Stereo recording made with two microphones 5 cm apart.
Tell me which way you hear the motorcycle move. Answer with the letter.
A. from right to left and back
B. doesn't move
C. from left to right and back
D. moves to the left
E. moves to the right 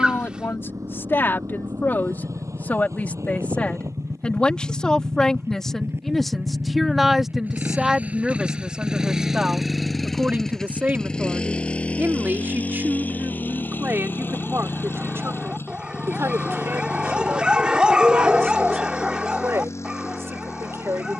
D.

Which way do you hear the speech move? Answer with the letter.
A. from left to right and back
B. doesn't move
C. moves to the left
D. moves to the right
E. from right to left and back
D.